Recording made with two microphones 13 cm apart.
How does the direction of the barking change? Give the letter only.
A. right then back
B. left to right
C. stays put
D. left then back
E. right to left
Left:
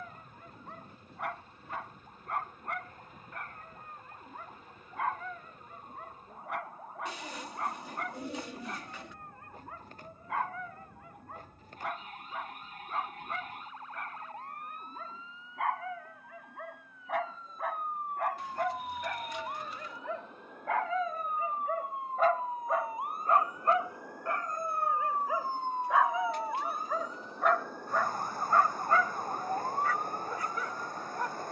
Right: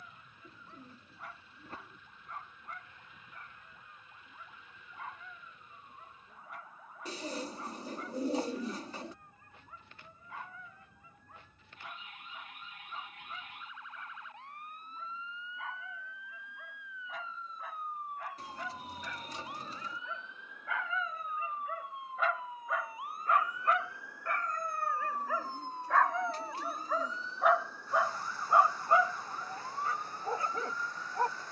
B.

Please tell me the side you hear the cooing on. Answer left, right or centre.
right.